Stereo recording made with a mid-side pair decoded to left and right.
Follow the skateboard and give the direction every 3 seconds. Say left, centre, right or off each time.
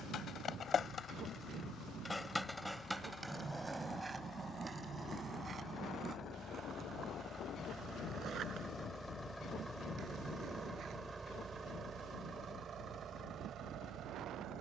left, right, right, right, off.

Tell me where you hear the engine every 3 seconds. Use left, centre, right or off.
left, left, left, centre, right.